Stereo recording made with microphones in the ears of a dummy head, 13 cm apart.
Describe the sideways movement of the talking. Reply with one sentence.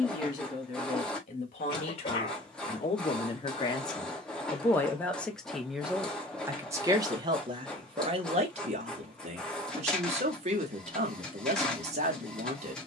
You can hear the talking move to the right.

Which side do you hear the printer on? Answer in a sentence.
In this clip you hear the printer in the centre.